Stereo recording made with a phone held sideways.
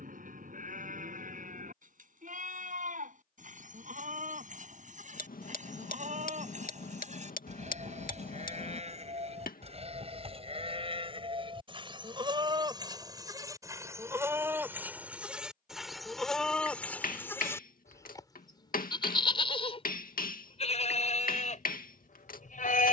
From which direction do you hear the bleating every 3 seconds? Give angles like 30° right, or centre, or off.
60° right, 50° right, 50° right, 40° right, 20° right, centre, 40° left, 50° left.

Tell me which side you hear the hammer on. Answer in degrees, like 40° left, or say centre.
70° left.